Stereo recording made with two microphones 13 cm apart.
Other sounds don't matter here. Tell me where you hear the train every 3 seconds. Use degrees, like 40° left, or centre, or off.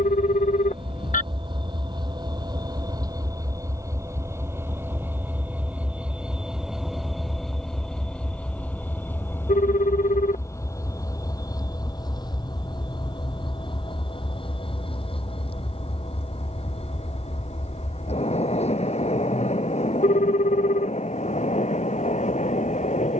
40° right, 20° right, centre, 20° left, 40° left, 50° left, 60° left, 60° left.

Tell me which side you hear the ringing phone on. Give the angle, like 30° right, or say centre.
80° left.